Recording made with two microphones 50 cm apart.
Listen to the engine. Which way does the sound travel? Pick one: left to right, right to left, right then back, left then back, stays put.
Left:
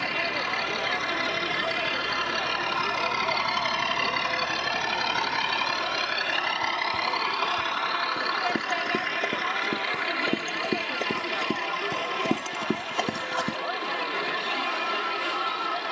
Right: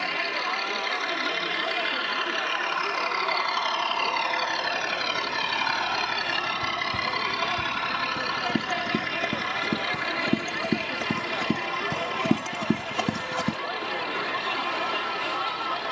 left to right.